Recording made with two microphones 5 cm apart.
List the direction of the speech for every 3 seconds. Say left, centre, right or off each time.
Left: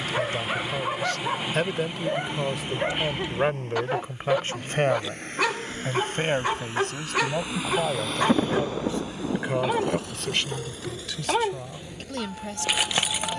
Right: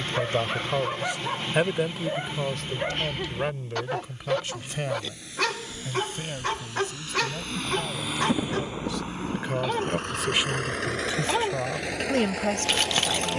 centre, left, left, centre, right.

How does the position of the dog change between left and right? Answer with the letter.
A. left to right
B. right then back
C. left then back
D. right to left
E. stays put
E.